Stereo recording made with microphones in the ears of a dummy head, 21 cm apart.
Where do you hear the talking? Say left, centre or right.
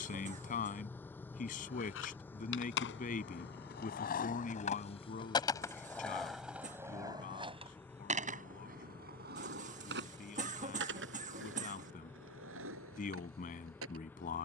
left.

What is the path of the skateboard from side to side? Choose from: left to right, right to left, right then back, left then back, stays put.
left to right.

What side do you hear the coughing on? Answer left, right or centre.
right.